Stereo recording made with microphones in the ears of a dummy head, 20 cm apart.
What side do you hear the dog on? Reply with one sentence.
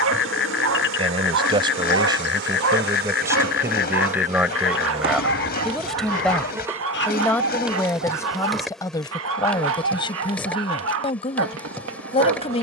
In this clip you hear the dog on the right.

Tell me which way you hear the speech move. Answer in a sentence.
You can hear the speech move from right to left.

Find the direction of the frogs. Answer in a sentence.
In this clip you hear the frogs on the left.